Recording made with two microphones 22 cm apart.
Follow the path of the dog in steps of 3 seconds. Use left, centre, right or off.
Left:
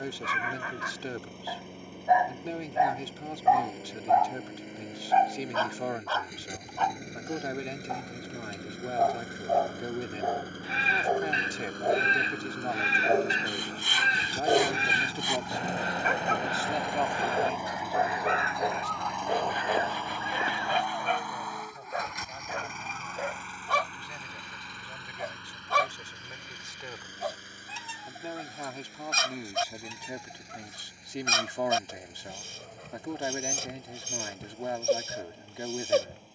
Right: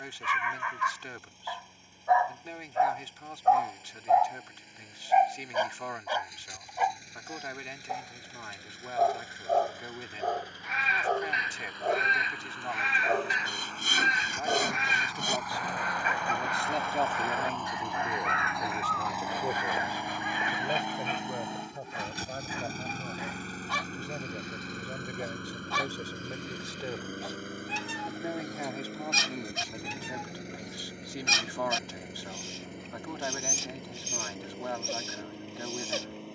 left, centre, centre, centre, left, left, left, left, left, left, left, left.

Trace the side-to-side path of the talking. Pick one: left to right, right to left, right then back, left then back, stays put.
right then back.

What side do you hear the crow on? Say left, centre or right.
left.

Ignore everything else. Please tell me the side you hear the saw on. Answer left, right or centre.
right.